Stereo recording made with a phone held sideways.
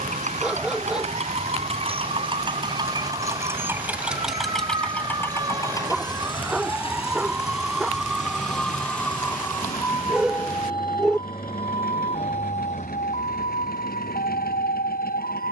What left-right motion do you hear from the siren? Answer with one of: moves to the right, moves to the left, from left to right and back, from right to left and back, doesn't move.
moves to the left.